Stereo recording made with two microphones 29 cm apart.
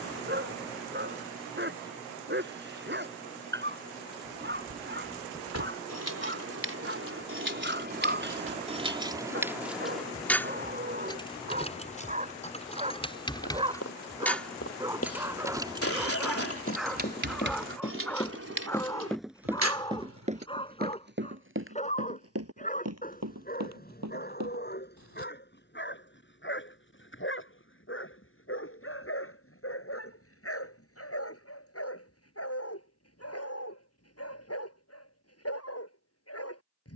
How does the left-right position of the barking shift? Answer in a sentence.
In this clip you hear the barking go from the right side to the left.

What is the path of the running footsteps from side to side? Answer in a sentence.
In this clip you hear the running footsteps travel towards the right.